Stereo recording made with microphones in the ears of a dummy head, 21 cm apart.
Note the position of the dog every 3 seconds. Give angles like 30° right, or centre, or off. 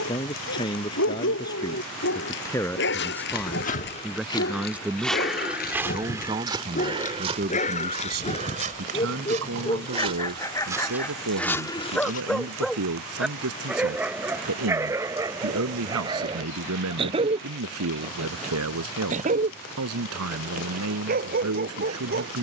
60° left, 40° left, 30° left, 20° left, 10° right, 20° right, 30° right, 40° right.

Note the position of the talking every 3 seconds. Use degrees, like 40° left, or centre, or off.
20° left, centre, 40° right, 70° right, 80° right, 80° right, 80° right, 80° right.